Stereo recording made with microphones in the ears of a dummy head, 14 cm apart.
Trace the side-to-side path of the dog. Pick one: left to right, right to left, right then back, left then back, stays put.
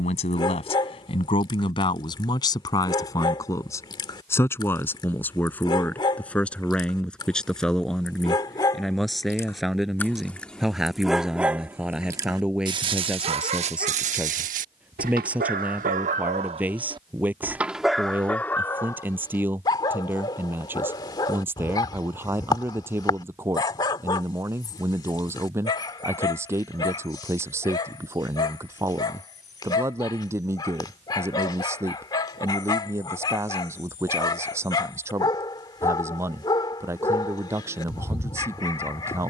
right then back.